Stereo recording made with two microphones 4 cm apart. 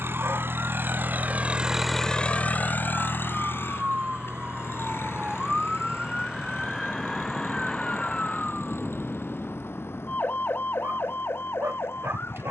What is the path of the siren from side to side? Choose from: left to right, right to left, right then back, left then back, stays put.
right to left.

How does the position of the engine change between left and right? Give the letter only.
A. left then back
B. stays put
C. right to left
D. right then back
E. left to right
C.